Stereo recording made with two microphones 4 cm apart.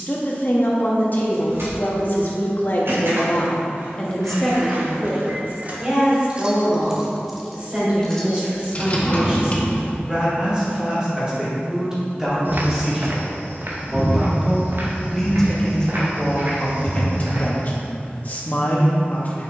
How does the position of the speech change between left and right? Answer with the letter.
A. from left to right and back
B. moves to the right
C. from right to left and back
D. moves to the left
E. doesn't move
A.